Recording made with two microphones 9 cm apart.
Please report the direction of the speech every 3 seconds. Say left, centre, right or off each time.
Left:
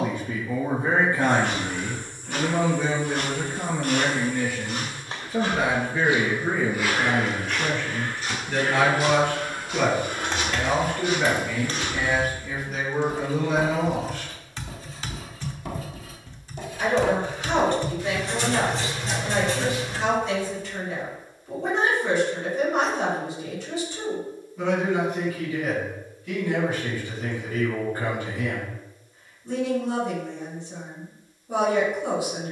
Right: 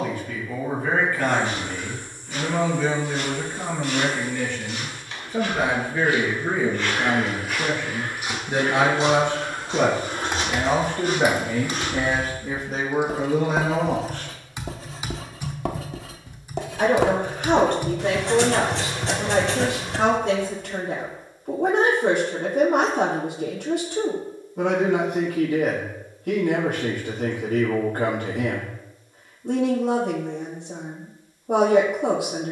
left, centre, centre, right, right, right, right, right, right, right, right.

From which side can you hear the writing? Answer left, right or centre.
right.